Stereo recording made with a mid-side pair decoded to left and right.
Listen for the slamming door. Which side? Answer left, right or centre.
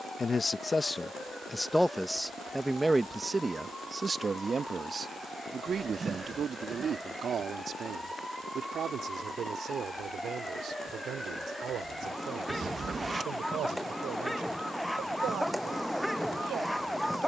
right.